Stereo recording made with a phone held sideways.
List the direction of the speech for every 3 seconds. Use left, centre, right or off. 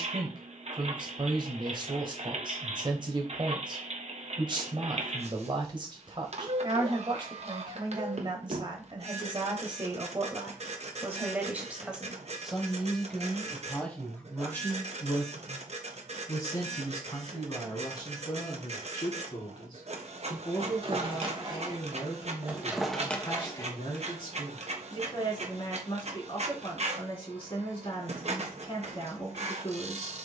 right, right, right, right, centre, left, left, left, left, left.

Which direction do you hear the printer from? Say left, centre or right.
right.